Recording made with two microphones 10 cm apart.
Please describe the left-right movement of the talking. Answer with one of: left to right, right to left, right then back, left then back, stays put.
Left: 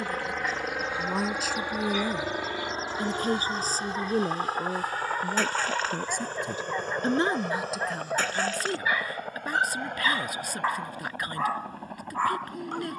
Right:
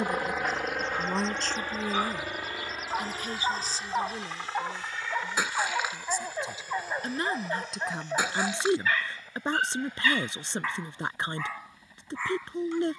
left then back.